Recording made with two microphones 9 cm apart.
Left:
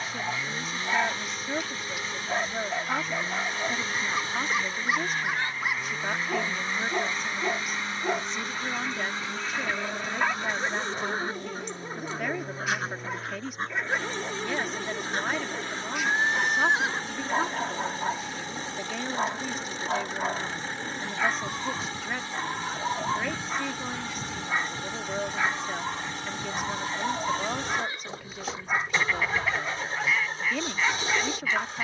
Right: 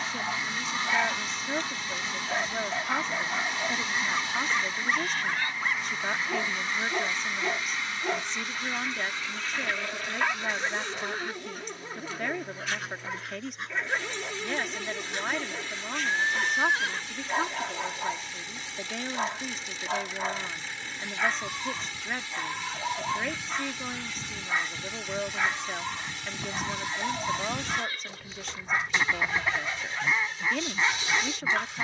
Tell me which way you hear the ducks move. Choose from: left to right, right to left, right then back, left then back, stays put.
left then back.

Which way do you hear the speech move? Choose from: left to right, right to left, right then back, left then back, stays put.
stays put.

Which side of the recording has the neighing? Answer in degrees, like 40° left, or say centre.
20° left.